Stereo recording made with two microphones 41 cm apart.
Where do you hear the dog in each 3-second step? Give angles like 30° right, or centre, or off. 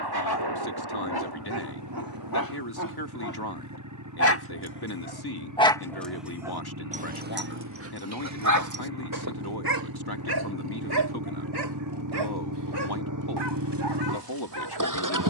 60° left, 30° left, 30° right, 60° right, 70° right.